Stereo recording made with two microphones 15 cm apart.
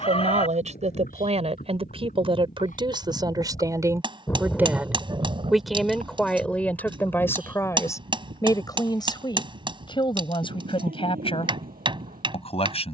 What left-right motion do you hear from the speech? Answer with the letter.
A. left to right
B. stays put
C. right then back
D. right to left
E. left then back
D.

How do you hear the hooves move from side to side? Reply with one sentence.
You can hear the hooves move from left to right.